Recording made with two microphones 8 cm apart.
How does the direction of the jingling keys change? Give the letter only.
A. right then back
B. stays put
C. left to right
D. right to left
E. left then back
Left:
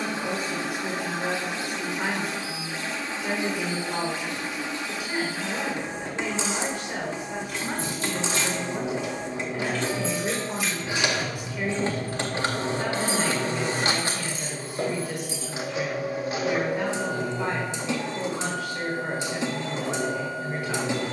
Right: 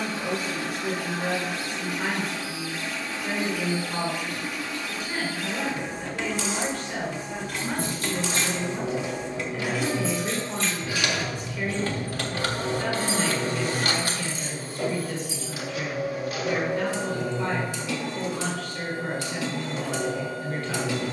D.